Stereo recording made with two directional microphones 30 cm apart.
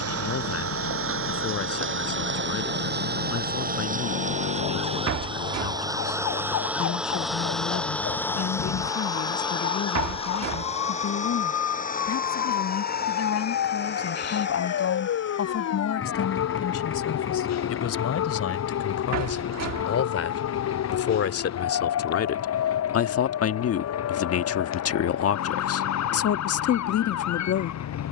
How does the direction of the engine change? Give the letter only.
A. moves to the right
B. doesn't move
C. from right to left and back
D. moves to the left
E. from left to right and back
D.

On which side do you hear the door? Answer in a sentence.
In this clip you hear the door on the right.